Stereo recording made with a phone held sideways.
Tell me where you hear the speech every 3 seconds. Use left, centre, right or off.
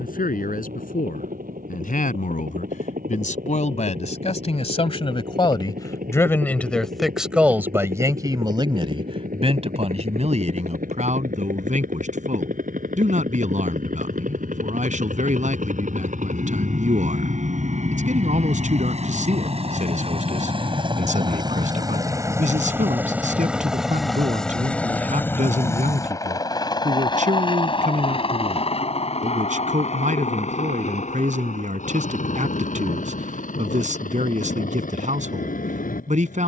left, left, centre, right, right, right, right, right, right, right, right, right.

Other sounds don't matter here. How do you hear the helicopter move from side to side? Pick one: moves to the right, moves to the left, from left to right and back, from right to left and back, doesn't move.
moves to the left.